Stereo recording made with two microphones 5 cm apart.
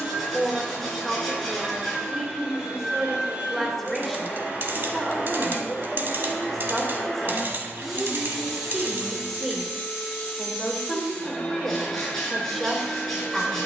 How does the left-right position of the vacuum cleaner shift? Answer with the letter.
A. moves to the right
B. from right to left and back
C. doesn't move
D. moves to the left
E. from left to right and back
D.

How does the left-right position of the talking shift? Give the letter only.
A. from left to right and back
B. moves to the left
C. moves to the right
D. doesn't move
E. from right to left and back
D.